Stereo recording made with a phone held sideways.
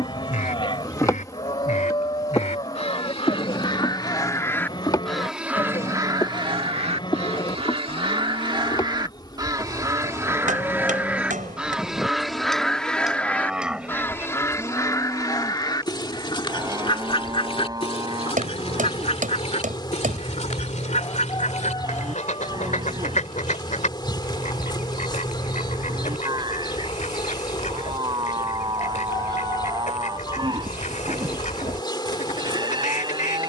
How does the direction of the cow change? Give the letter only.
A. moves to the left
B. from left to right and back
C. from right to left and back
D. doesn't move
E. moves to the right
E.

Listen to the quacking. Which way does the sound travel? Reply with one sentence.
You can hear the quacking move from left to right and back again.